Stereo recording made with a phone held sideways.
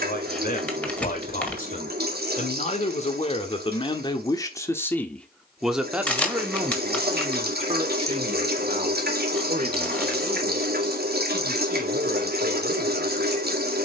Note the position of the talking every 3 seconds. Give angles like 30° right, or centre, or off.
50° left, 20° left, 30° right, 60° right, 70° right.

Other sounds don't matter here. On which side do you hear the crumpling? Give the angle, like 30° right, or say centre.
10° left.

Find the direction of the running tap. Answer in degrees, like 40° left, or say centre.
70° right.